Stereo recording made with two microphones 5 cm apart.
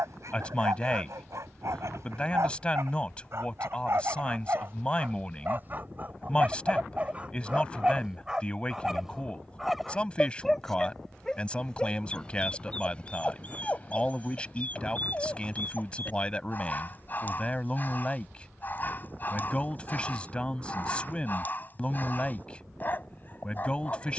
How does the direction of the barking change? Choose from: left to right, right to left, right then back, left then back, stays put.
right to left.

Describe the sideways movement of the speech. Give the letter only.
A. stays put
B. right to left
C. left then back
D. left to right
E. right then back
A.